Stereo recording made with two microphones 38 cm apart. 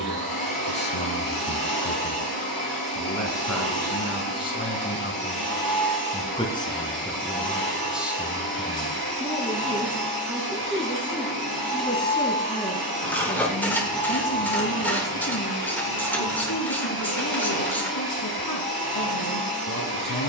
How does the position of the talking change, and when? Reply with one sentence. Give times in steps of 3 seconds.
In this clip you hear the talking on the left from 0 s, in the centre from 6 s and on the left from 12 s.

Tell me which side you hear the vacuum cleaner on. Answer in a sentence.
In this clip you hear the vacuum cleaner on the right.